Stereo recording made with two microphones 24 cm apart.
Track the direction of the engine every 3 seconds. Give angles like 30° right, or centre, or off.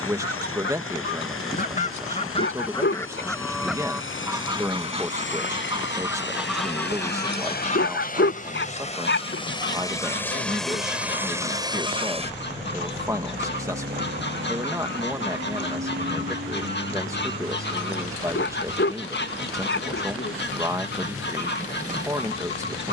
70° left, 60° left, 40° left, centre, 40° right, 70° right, 70° right, 80° right.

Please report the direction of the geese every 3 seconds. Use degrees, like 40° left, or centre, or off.
40° left, 10° right, 20° left, 50° left, 50° left, 50° left, 50° left, 50° left.